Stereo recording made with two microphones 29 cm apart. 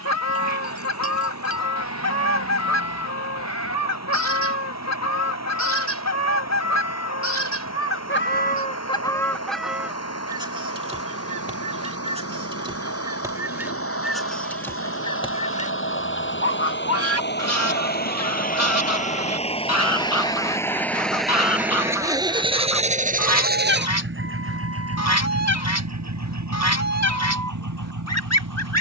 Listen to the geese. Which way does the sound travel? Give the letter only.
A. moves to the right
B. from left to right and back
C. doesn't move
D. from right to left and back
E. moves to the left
B.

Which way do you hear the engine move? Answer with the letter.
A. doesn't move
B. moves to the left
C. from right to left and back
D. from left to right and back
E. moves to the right
E.